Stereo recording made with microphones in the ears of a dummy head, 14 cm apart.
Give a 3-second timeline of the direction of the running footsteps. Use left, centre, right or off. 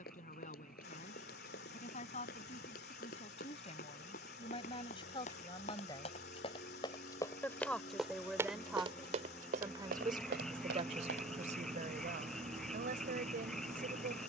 left, left, centre, right, off.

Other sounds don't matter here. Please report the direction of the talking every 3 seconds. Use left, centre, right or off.
left, left, centre, right, right.